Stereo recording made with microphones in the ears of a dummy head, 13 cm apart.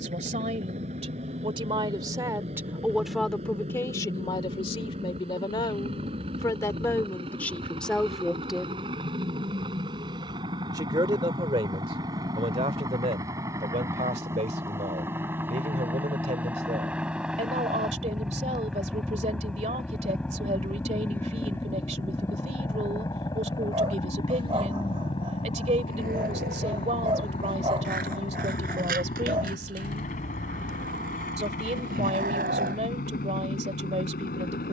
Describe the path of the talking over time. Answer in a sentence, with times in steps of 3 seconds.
You can hear the talking on the right from 0 s, on the left from 3 s, in the centre from 6 s and on the right from 9 s.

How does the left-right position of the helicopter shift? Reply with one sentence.
In this clip you hear the helicopter move to the left.